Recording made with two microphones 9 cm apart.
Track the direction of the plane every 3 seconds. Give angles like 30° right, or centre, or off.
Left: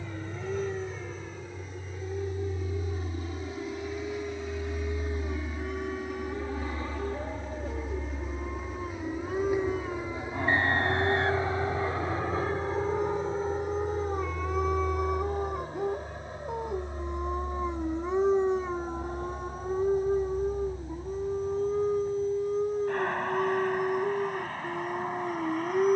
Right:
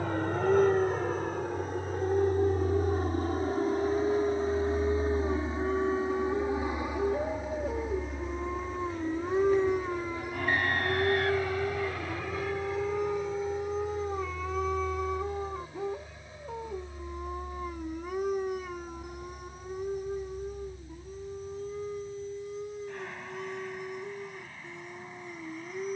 60° right, 40° right, 10° right, 20° left, 40° left, 50° left, 50° left, 60° left, 60° left.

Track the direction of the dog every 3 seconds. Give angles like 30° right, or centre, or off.
40° right, 40° right, 30° right, 20° right, centre, 20° left, 30° left, 50° left, 50° left.